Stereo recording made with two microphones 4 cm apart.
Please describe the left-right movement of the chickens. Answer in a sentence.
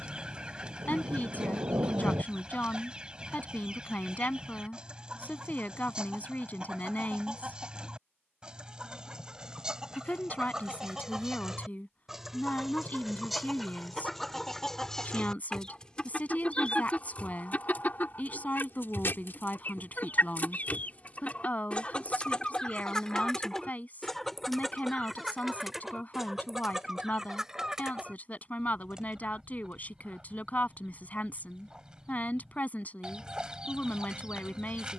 In this clip you hear the chickens move from right to left and back again.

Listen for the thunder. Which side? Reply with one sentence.
You can hear the thunder on the right.